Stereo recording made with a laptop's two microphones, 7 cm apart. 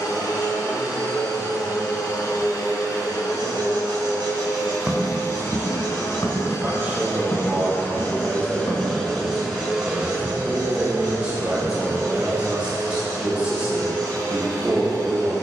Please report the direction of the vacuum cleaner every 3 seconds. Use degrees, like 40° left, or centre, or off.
60° left, 60° left, 30° left, 20° right, 50° right.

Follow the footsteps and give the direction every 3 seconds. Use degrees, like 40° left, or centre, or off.
off, 10° left, 40° left, 30° left, 10° right.